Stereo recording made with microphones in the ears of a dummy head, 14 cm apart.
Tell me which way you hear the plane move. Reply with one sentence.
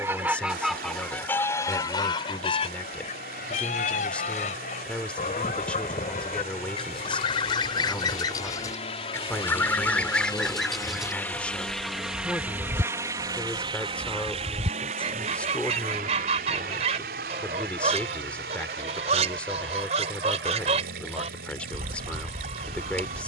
You can hear the plane move from left to right.